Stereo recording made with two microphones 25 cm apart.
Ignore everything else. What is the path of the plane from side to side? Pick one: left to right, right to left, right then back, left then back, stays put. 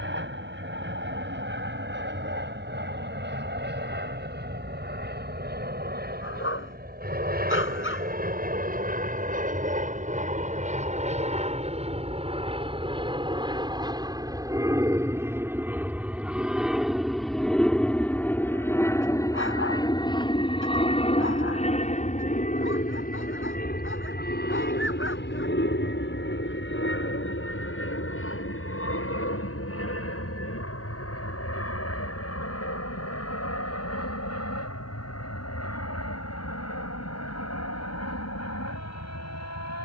right to left.